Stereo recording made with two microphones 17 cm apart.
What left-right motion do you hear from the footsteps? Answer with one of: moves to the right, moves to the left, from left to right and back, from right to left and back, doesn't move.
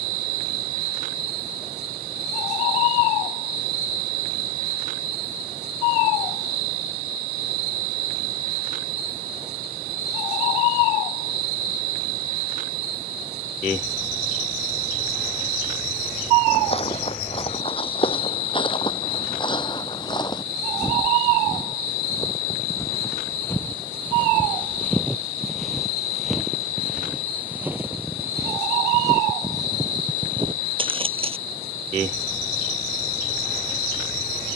moves to the right.